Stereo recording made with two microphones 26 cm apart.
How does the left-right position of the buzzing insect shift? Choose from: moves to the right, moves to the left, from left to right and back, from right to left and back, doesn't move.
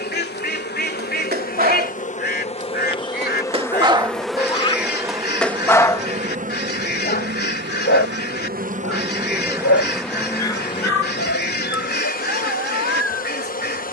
from left to right and back.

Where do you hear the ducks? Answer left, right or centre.
left.